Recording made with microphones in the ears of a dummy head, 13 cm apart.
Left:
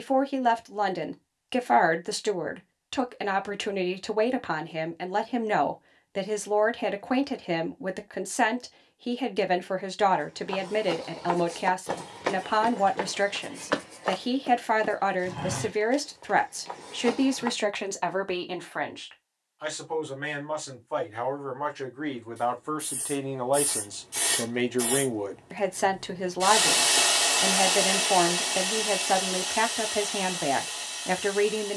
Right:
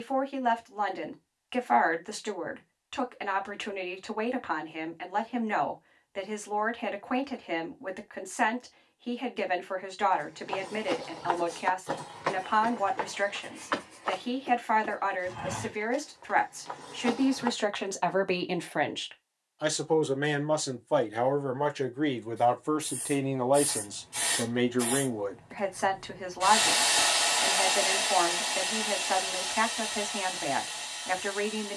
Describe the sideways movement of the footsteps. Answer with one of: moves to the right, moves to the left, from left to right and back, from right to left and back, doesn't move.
from right to left and back.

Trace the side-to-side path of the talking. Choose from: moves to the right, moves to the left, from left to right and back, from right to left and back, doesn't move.
from left to right and back.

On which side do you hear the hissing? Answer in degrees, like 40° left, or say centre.
50° left.